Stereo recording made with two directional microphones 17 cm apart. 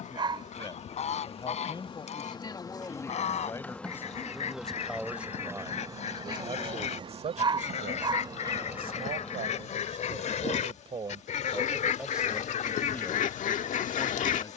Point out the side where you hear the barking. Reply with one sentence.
You can hear the barking on the right.